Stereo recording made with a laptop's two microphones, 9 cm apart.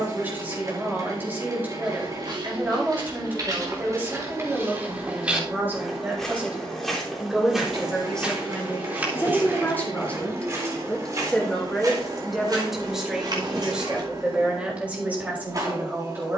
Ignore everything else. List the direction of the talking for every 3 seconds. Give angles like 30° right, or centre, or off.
20° right, 20° right, centre, 20° left, 10° right, 20° right.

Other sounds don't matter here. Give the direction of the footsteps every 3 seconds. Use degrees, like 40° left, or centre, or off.
60° right, 30° right, centre, 30° right, 50° right, off.